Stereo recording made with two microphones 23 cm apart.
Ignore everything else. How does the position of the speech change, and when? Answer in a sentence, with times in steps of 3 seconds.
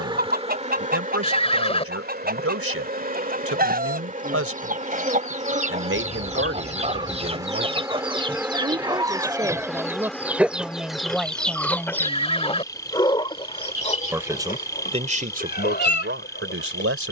In this clip you hear the speech on the right from 0 s, in the centre from 9 s and on the right from 15 s.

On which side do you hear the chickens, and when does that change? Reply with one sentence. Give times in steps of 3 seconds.
In this clip you hear the chickens on the right from 0 s, in the centre from 9 s and on the left from 12 s.